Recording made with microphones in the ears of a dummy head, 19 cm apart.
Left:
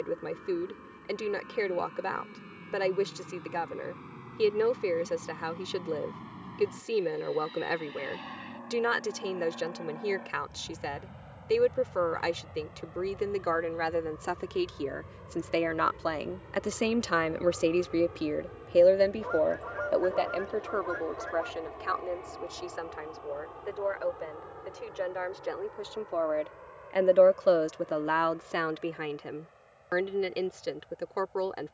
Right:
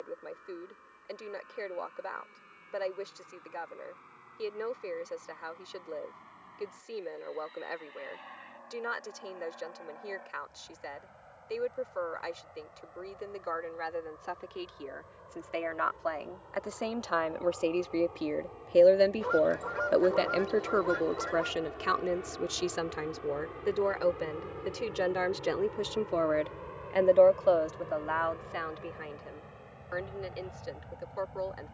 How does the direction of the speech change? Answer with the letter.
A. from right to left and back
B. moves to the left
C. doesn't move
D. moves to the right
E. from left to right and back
E.